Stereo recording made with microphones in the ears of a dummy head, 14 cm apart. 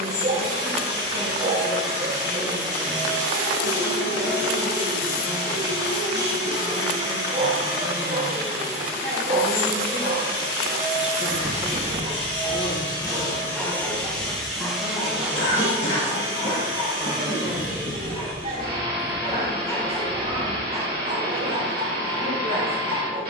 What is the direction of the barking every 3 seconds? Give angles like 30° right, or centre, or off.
40° right, 40° right, 40° right, 40° right, centre, 40° left, 20° left, 30° right.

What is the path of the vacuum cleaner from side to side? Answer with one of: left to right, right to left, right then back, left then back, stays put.
left to right.